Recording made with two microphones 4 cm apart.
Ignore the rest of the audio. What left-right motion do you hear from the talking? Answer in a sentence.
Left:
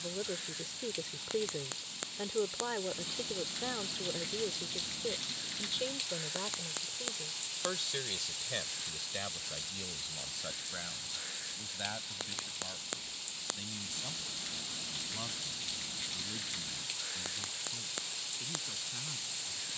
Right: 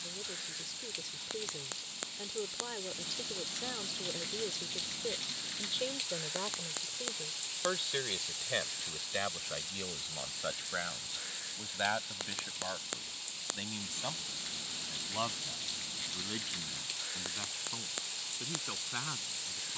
You can hear the talking travel towards the right.